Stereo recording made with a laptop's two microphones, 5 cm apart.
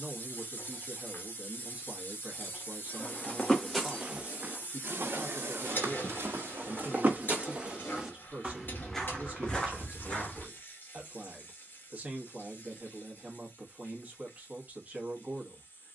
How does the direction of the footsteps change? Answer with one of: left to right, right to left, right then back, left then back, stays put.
right then back.